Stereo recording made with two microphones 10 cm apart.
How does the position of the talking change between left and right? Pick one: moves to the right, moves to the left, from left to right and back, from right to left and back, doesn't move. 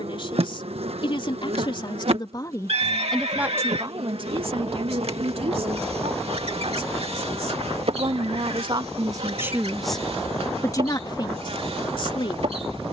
from left to right and back.